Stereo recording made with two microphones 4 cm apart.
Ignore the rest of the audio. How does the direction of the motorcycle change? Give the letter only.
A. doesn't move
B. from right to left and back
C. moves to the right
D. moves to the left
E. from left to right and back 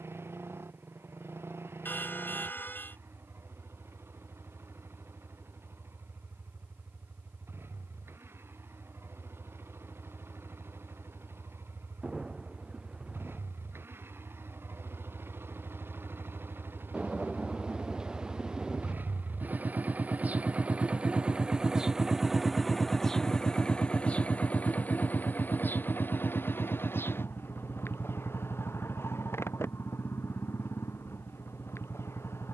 D.